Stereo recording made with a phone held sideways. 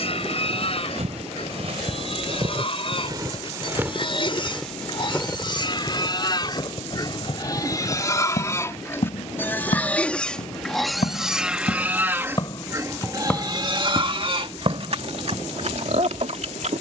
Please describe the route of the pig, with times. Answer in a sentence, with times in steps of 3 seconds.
In this clip you hear the pig on the left from 0 s, in the centre from 9 s and on the right from 12 s.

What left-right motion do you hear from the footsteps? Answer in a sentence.
In this clip you hear the footsteps move from right to left and back again.